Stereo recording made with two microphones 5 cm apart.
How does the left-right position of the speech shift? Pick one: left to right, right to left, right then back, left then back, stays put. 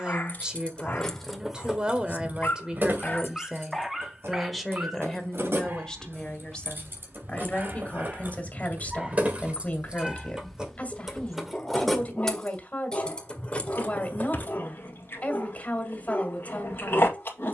right to left.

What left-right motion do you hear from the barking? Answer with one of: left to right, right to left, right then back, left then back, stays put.
right then back.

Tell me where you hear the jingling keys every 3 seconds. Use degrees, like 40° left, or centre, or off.
10° right, 50° right, 40° right, 10° right, 20° left, off.